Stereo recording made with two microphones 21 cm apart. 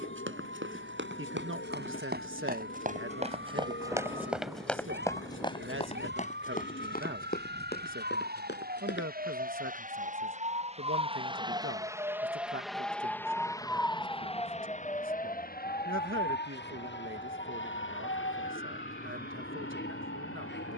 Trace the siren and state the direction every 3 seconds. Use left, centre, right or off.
right, right, right, right, centre, left, left.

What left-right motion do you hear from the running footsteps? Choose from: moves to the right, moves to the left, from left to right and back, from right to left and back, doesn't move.
moves to the left.